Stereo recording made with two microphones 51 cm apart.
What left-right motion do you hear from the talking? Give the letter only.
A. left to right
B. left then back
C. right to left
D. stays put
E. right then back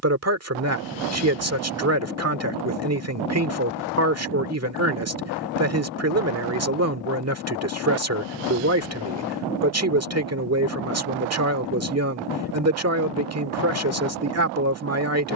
D.